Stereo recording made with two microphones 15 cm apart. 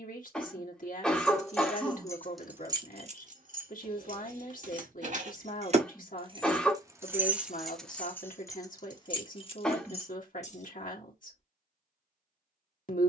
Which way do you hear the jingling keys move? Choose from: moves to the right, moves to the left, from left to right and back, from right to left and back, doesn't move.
from left to right and back.